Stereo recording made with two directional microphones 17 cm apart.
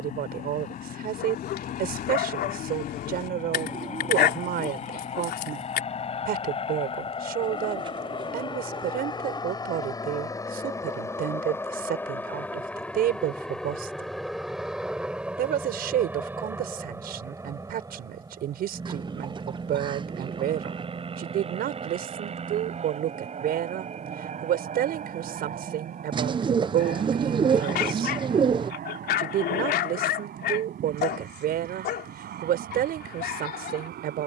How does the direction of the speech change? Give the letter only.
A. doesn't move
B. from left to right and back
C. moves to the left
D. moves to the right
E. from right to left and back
A.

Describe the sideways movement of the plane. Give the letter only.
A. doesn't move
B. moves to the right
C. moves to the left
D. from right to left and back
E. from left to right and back
B.